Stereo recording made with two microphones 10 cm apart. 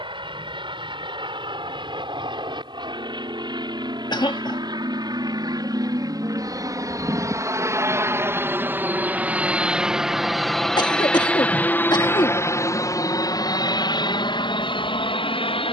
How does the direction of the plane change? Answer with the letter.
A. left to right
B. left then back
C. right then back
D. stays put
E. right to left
E.